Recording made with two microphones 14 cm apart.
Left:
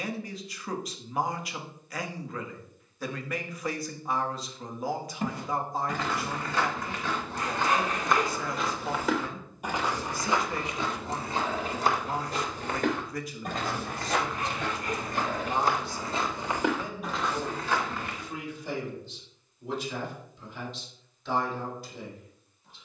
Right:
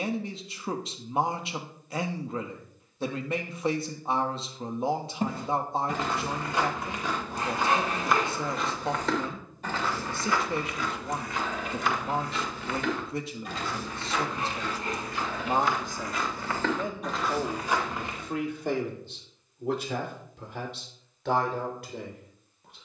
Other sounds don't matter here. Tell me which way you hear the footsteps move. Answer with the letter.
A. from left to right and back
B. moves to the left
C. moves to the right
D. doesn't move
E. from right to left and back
E.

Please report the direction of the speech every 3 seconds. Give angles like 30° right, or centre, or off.
30° right, 30° right, 30° right, 30° right, 30° right, 50° right, 60° right, 70° right.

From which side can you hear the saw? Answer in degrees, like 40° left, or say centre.
30° right.